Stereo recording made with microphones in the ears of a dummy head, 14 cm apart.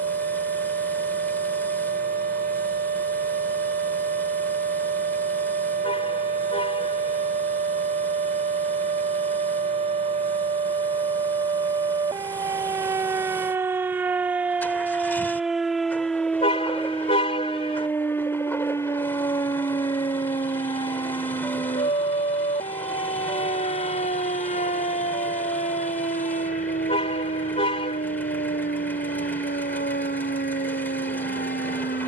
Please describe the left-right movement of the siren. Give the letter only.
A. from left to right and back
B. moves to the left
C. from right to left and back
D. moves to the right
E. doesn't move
B.